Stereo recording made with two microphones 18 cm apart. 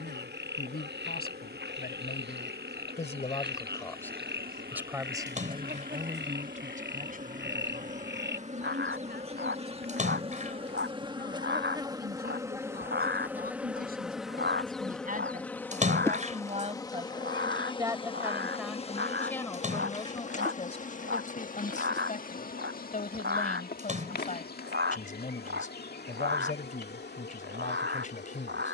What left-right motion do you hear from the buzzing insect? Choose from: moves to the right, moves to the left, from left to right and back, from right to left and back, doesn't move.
moves to the left.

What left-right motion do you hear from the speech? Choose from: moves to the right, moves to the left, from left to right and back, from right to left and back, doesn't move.
from left to right and back.